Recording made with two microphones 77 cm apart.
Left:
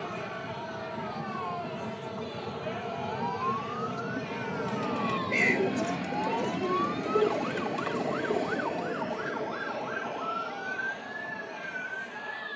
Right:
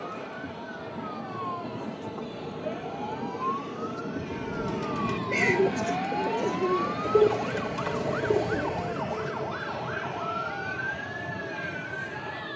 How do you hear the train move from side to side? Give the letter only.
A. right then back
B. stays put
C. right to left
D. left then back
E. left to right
E.